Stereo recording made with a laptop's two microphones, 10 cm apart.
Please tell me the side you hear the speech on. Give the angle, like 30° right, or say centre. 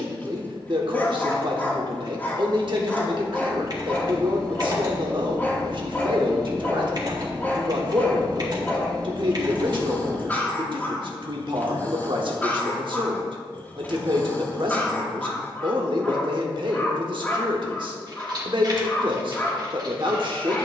60° right.